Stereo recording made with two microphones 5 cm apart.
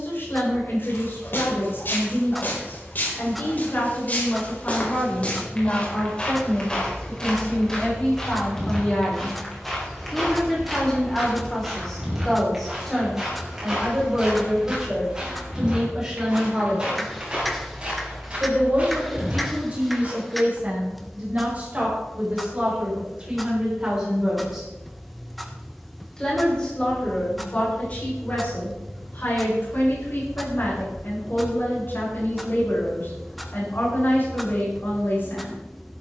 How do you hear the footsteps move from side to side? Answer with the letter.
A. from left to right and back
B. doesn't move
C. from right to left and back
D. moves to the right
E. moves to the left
D.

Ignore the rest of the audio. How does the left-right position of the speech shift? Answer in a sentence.
You can hear the speech go right and come back.